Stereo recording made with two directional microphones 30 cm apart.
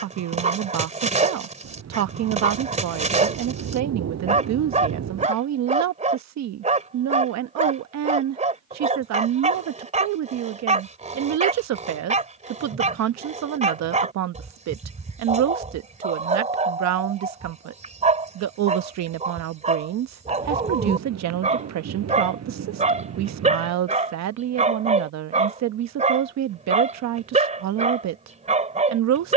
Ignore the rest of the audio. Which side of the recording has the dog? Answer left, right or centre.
right.